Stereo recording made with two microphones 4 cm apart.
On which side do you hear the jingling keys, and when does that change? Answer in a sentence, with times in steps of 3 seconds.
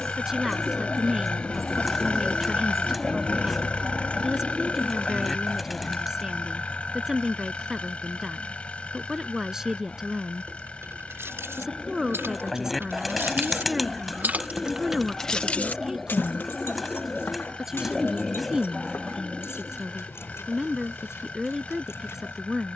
You can hear the jingling keys not at all from 0 s, on the right from 9 s and on the left from 15 s.